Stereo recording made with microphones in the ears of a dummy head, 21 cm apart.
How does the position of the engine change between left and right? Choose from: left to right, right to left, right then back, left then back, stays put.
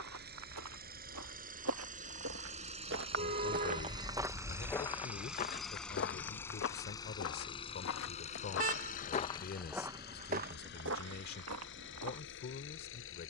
right to left.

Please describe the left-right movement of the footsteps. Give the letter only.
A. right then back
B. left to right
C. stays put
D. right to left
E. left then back
E.